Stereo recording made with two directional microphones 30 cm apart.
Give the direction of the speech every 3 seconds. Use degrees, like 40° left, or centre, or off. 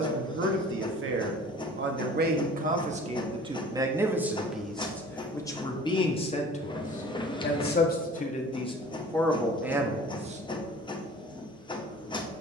40° right, centre, 20° left, 10° right.